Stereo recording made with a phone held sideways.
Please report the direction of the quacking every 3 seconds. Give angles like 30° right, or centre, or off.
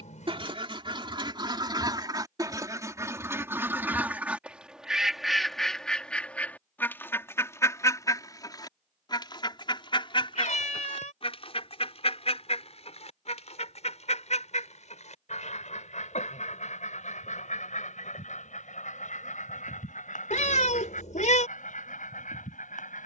30° right, 10° right, 20° left, 40° left, 50° left, 60° left, 70° left, 70° left.